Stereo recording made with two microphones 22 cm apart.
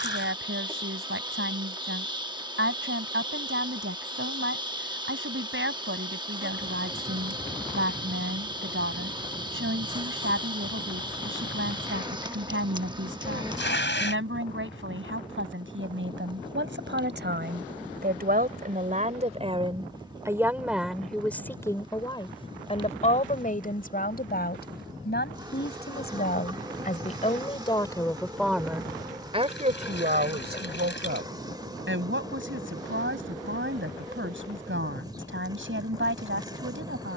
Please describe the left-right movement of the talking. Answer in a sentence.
You can hear the talking move from right to left and back again.